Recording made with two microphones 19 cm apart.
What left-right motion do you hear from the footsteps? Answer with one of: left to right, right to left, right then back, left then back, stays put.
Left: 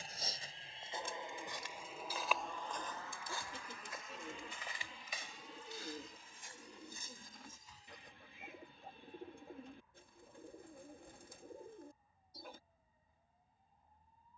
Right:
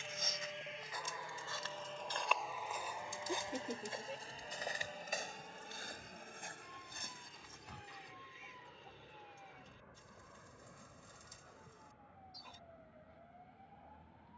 left to right.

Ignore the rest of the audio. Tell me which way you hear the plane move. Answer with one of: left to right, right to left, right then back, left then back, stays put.
left to right.